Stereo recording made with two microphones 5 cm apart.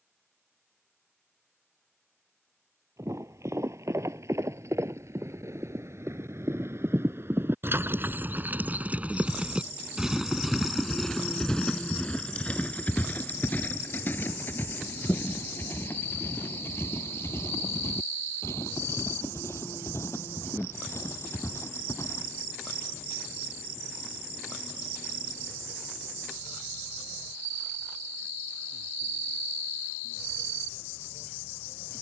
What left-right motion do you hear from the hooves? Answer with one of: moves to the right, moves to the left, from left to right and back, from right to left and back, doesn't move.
moves to the left.